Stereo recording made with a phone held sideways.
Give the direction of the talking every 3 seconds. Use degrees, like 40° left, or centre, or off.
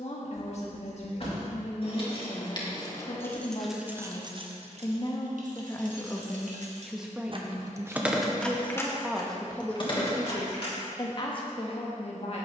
50° left, 40° left, 10° right, 20° left.